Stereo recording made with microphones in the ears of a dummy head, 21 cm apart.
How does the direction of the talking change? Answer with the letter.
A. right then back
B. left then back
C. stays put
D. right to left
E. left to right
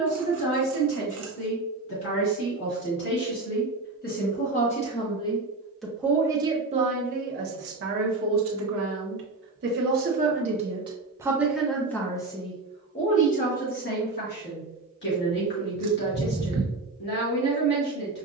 A.